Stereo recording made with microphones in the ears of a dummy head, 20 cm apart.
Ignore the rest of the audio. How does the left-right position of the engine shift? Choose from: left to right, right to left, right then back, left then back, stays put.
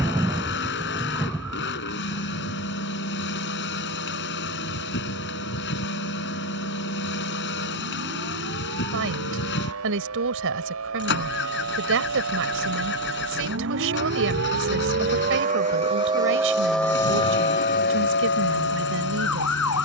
stays put.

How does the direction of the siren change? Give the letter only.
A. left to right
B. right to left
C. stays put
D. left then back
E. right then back
B.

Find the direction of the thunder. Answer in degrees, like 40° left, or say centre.
10° right.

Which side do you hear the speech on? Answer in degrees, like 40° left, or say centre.
60° right.